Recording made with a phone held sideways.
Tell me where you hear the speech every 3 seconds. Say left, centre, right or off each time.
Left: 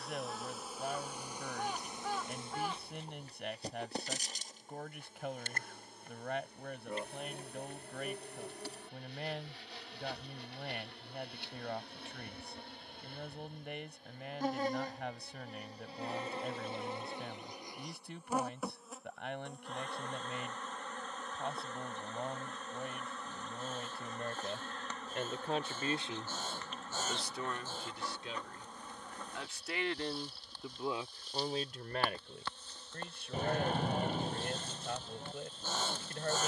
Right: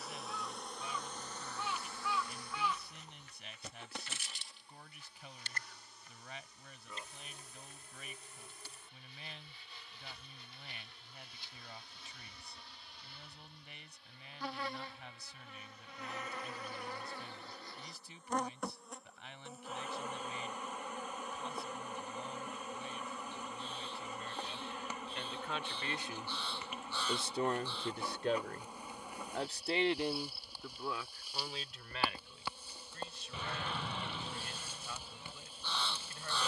left, left, left, left, left, left, left, left, left, right, left, left.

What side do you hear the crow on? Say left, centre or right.
left.